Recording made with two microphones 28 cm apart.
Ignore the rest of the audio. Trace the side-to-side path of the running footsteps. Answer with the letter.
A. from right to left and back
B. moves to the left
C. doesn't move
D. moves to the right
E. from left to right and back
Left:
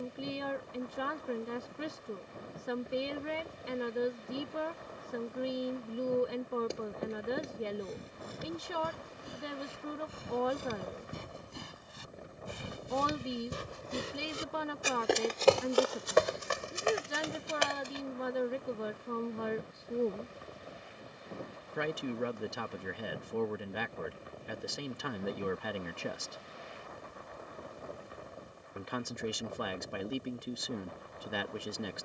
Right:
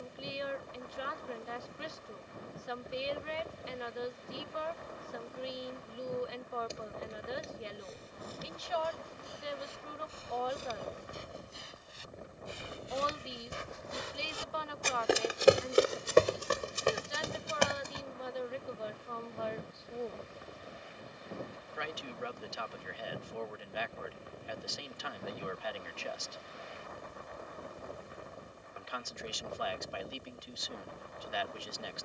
D.